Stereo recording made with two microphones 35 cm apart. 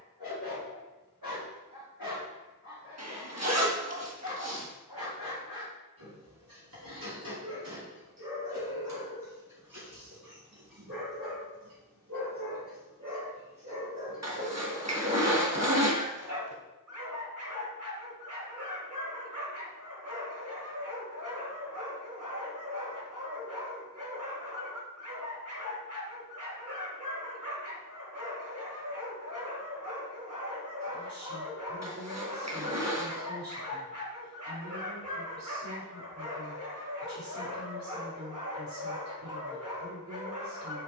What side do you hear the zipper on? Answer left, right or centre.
right.